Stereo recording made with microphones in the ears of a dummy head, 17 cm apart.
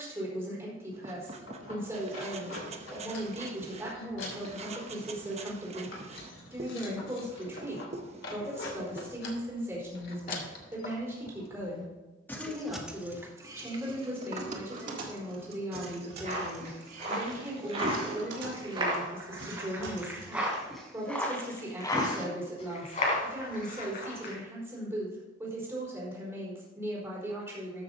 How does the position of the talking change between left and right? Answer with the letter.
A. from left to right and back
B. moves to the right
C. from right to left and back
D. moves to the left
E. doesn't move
E.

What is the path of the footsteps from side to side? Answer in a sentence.
In this clip you hear the footsteps move from right to left.